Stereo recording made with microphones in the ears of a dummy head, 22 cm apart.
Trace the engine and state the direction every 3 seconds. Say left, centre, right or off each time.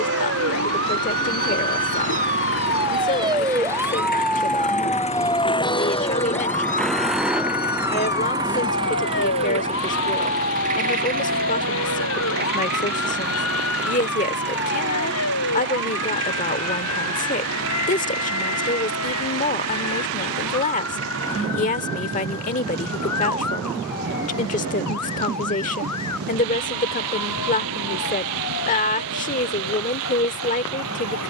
left, left, centre, right, right, right, right, right, right, right, right.